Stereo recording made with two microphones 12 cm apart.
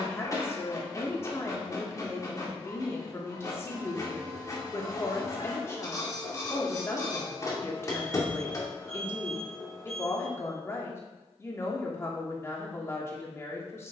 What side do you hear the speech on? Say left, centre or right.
left.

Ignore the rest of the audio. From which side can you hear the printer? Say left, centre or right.
left.